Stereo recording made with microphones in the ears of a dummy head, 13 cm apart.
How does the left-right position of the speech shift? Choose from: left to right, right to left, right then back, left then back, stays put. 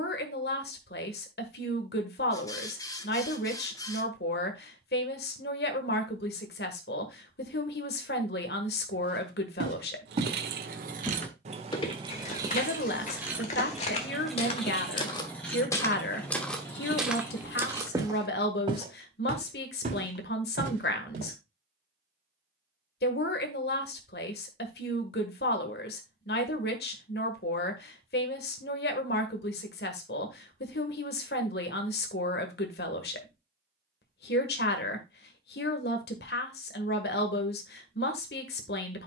stays put.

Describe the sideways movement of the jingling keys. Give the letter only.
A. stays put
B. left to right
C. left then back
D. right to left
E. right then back
D.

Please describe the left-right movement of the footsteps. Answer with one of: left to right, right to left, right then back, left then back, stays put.
left then back.